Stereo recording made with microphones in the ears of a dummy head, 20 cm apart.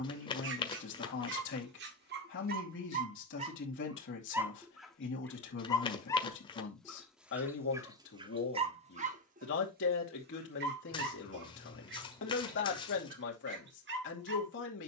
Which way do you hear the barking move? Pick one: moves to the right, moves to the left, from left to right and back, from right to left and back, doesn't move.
from right to left and back.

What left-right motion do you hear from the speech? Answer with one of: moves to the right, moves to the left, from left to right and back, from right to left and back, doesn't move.
doesn't move.